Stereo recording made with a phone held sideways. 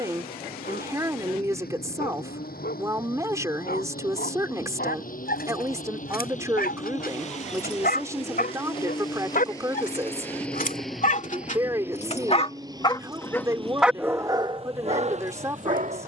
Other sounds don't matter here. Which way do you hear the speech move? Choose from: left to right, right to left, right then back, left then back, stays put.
stays put.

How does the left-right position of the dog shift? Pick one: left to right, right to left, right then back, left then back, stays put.
left to right.